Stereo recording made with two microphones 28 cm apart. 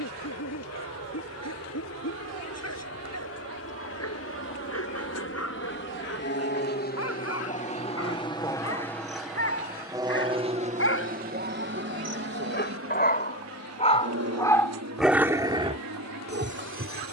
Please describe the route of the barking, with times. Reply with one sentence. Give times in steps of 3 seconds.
In this clip you hear the barking on the left from 0 s and on the right from 15 s.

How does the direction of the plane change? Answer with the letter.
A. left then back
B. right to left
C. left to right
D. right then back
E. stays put
C.